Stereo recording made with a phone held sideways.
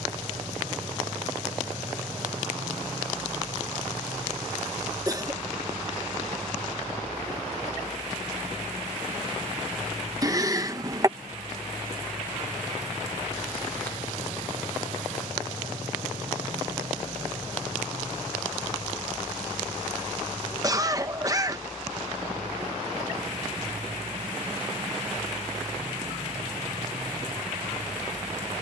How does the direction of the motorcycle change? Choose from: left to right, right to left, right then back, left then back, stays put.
stays put.